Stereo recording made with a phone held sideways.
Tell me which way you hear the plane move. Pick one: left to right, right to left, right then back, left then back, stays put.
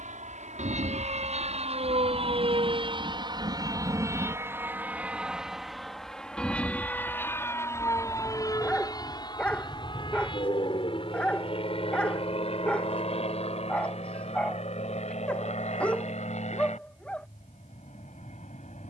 right to left.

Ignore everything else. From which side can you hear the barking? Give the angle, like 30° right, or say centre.
10° left.